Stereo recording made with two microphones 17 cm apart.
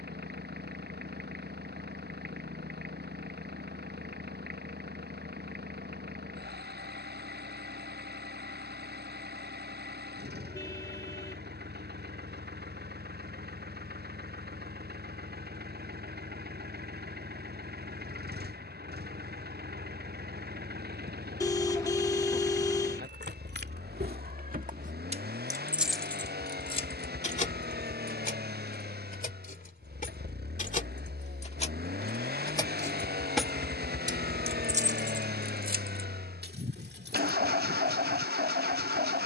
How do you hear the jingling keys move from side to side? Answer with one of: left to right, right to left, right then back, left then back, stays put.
left then back.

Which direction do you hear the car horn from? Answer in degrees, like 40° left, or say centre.
20° left.